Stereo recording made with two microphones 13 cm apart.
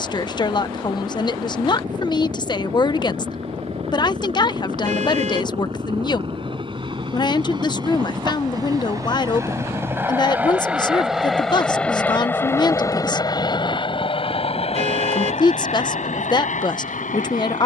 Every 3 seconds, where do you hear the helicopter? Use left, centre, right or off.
right, right, right, centre, left, left.